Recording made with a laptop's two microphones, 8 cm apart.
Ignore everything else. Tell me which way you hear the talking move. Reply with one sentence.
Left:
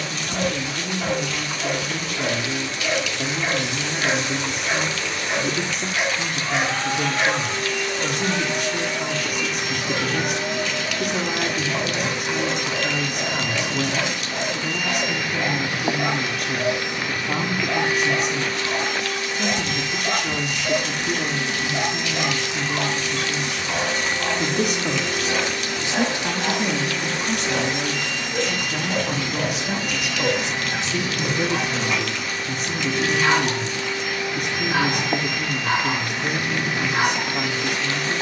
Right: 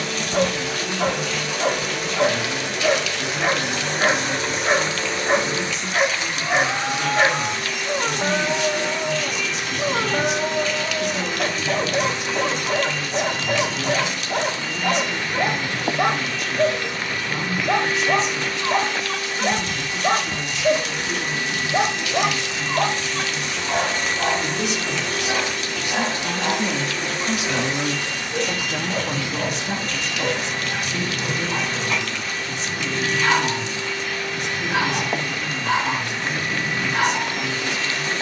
In this clip you hear the talking move from left to right and back again.